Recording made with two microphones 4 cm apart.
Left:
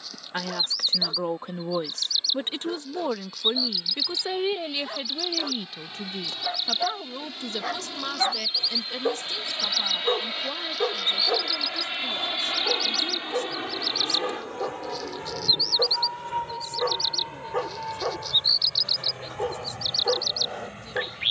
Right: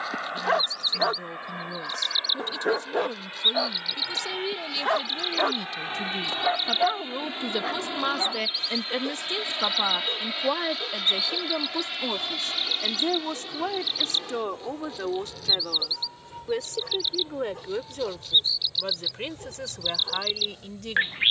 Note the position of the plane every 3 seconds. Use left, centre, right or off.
right, right, right, centre, left, left, left.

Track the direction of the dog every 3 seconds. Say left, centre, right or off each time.
right, right, centre, left, left, left, left.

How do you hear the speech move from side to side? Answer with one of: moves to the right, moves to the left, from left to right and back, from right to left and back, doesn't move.
moves to the right.